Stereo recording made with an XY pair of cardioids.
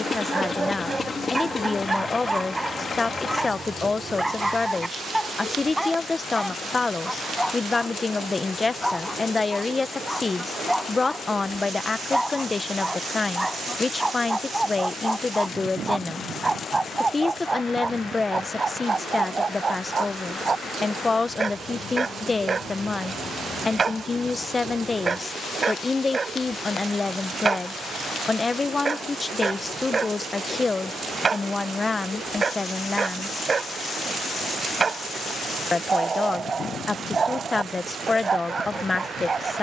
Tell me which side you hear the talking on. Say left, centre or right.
left.